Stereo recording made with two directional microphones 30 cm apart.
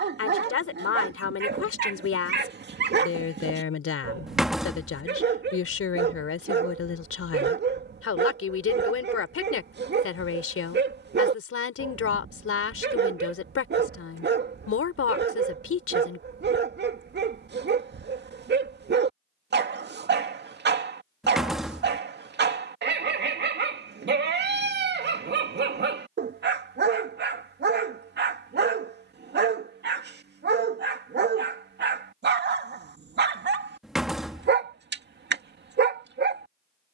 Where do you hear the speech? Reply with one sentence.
You can hear the speech on the left.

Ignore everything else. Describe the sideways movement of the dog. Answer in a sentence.
In this clip you hear the dog stay put.